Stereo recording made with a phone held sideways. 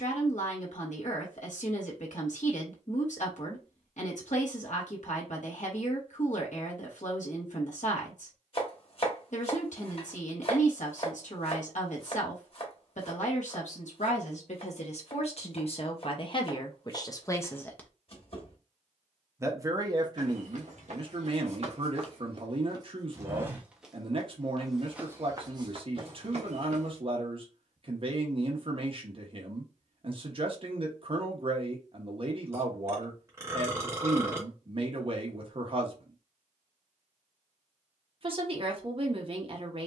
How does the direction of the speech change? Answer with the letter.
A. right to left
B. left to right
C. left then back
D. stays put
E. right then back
B.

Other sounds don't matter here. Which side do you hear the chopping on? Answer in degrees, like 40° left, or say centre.
50° left.